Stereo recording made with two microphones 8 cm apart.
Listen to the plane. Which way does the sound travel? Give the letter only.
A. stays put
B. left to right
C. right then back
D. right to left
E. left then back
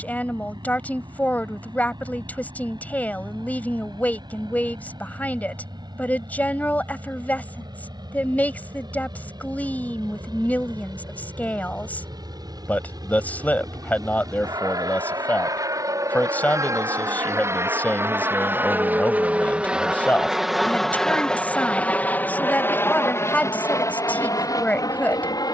D.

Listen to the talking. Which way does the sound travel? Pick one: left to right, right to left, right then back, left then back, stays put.
stays put.